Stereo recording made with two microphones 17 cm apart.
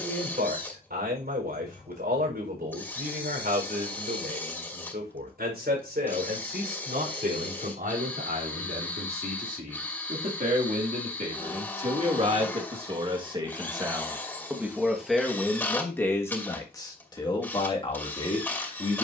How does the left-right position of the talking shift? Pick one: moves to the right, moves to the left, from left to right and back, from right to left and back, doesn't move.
moves to the left.